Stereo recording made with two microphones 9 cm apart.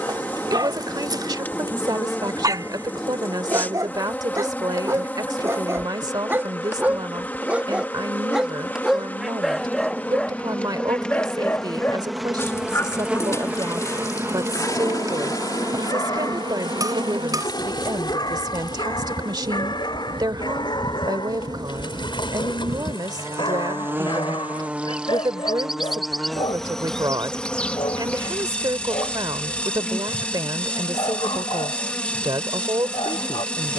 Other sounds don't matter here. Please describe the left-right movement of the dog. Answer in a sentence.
In this clip you hear the dog move from right to left.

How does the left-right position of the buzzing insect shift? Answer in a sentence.
You can hear the buzzing insect go right and come back.